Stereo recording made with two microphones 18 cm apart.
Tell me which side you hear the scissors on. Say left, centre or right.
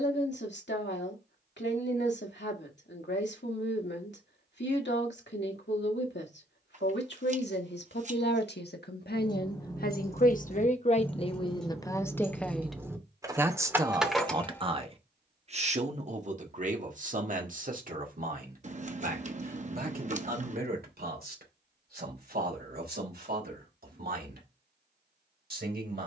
right.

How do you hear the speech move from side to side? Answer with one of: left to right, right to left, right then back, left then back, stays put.
left to right.